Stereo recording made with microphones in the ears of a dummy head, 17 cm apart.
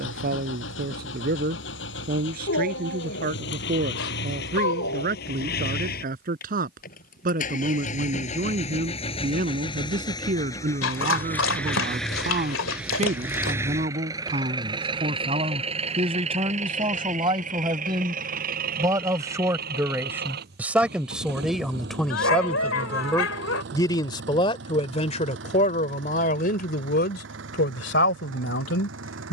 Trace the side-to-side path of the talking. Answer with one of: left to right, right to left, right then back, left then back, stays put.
right to left.